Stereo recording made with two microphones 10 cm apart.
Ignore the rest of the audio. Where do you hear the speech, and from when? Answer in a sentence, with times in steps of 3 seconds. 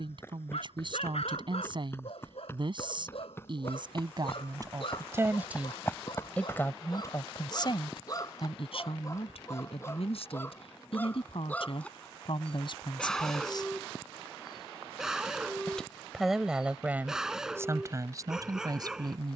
You can hear the speech on the right from 0 s, on the left from 6 s, in the centre from 15 s and on the right from 18 s.